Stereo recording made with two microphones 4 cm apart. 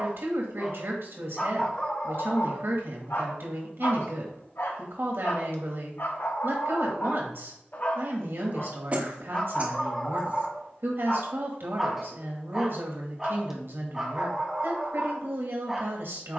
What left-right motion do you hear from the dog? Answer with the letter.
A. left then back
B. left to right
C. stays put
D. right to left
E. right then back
A.